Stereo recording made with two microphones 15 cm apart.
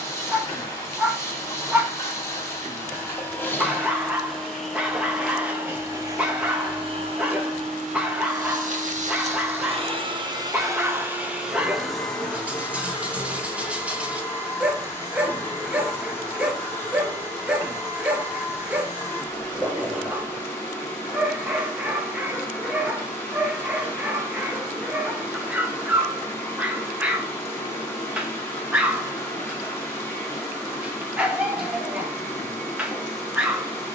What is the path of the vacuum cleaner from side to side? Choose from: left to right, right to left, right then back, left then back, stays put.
right then back.